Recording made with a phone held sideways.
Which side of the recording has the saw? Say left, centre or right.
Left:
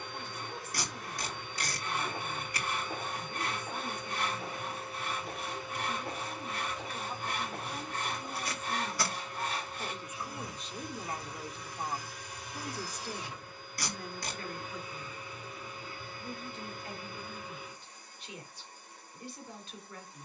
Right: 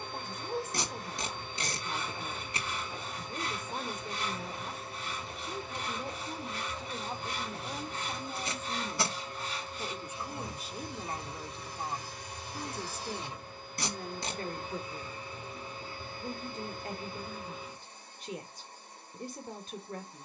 left.